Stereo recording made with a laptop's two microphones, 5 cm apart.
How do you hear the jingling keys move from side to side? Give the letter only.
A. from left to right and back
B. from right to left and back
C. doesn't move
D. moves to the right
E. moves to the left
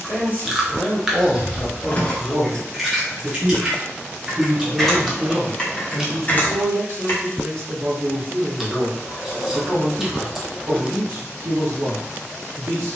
A.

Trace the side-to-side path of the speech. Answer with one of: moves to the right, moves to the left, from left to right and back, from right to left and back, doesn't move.
moves to the right.